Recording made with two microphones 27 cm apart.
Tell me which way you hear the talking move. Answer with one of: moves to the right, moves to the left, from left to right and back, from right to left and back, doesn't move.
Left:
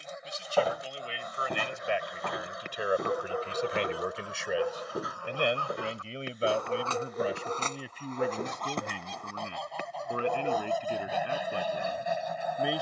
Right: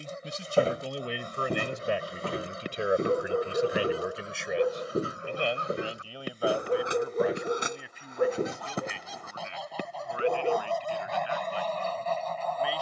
moves to the left.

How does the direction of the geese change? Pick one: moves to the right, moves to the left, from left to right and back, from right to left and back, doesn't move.
moves to the left.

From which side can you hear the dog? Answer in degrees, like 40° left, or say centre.
40° right.